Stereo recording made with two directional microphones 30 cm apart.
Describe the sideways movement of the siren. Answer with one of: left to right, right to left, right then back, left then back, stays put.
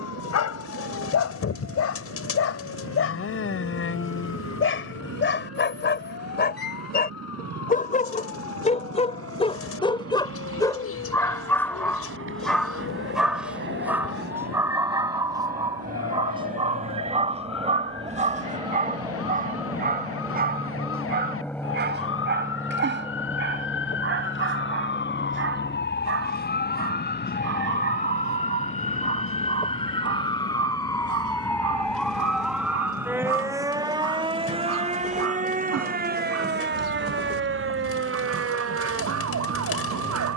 left to right.